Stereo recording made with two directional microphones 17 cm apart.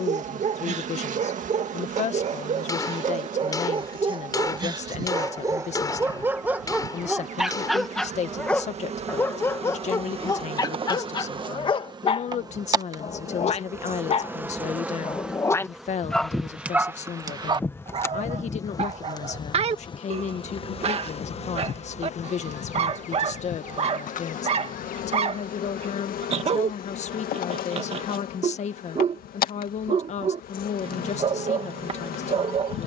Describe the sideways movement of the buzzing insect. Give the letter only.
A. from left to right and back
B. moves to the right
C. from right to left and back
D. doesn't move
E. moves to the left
E.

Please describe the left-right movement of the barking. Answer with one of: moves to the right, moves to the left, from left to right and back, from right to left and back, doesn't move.
from right to left and back.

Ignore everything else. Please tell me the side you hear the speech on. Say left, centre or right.
left.